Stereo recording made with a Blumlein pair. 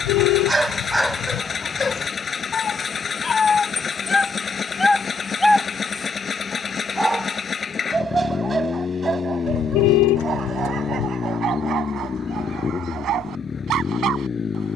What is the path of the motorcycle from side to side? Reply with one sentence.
In this clip you hear the motorcycle stay put.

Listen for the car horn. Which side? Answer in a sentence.
In this clip you hear the car horn on the left.